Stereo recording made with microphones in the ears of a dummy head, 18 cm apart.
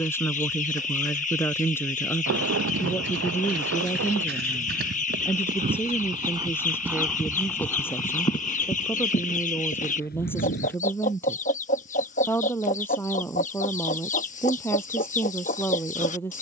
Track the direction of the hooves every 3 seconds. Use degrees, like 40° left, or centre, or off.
70° right, 50° right, centre, 40° left, off, off.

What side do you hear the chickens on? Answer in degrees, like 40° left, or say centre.
40° left.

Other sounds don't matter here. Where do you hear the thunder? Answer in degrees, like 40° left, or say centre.
70° right.